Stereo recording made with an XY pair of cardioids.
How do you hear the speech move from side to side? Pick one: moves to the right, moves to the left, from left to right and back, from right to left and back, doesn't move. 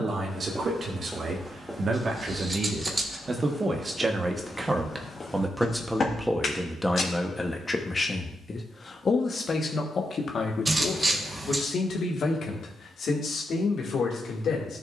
moves to the left.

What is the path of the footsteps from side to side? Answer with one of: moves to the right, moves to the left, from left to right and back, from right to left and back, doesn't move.
moves to the left.